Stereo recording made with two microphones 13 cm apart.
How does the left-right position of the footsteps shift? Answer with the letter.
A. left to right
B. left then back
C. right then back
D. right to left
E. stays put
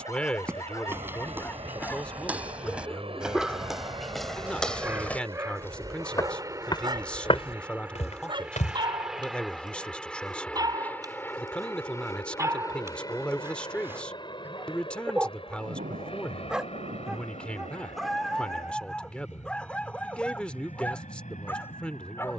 D.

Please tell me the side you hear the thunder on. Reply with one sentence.
In this clip you hear the thunder on the right.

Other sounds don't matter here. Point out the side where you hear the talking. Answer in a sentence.
In this clip you hear the talking in the centre.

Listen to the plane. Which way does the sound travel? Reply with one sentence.
You can hear the plane travel towards the left.